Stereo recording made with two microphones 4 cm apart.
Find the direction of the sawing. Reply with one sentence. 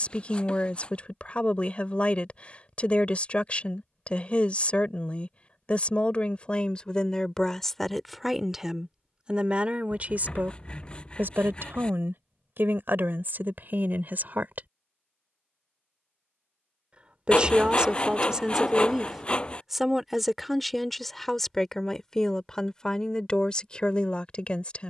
In this clip you hear the sawing on the left.